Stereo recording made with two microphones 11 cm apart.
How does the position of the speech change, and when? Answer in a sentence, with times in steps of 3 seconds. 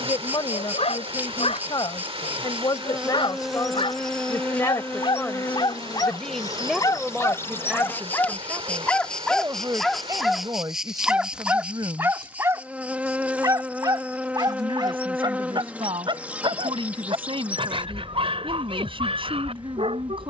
You can hear the speech on the left from 0 s, in the centre from 6 s and on the right from 9 s.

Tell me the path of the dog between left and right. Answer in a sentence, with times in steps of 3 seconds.
You can hear the dog on the left from 0 s, in the centre from 9 s and on the right from 12 s.